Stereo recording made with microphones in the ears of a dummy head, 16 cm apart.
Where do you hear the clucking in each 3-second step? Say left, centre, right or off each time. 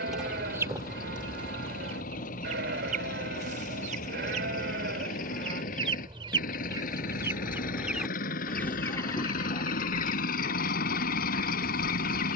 right, right, centre, left.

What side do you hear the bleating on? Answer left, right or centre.
right.